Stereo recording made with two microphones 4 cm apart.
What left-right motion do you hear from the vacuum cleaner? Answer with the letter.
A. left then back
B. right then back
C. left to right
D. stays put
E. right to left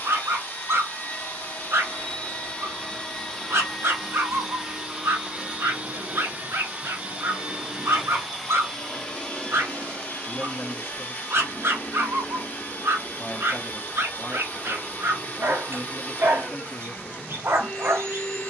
B.